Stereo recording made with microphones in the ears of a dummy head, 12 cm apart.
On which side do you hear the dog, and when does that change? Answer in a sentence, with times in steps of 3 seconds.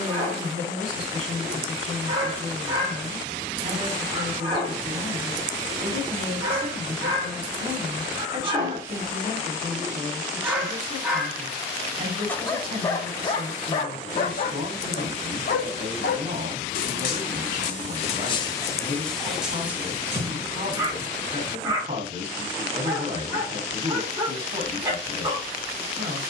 You can hear the dog on the right from 0 s, in the centre from 9 s, on the left from 12 s, in the centre from 18 s and on the right from 21 s.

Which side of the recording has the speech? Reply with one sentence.
In this clip you hear the speech on the right.